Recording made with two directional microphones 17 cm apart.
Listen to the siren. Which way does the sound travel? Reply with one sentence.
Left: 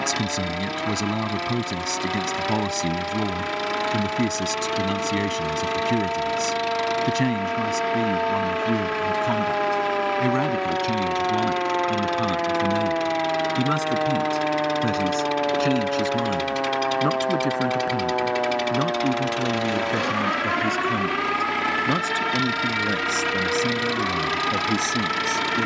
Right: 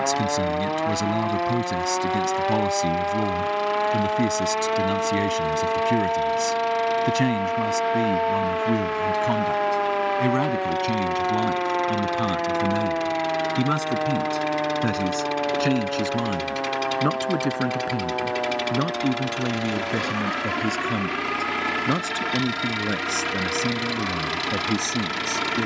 You can hear the siren go from the right side to the left.